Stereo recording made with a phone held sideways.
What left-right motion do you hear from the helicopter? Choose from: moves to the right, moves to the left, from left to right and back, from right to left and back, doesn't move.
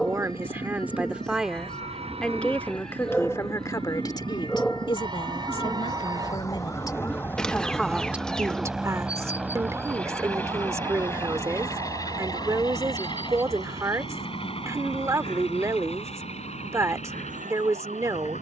moves to the left.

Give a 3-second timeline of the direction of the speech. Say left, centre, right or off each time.
centre, left, centre, right, right, right.